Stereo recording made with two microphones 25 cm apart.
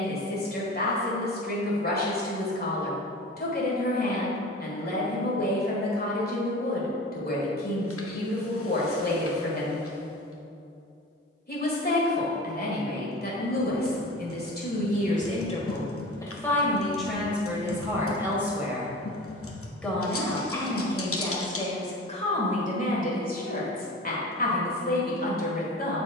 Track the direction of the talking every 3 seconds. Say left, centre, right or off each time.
left, left, left, left, left, centre, centre, left, left.